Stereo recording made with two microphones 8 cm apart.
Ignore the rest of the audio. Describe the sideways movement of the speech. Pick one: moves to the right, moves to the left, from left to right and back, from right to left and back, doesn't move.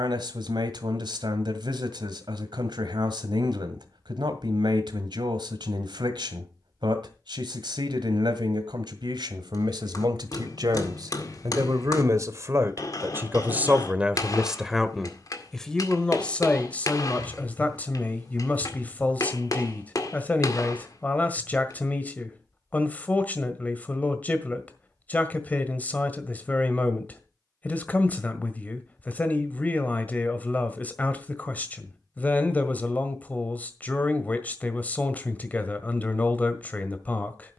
moves to the left.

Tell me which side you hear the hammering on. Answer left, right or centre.
left.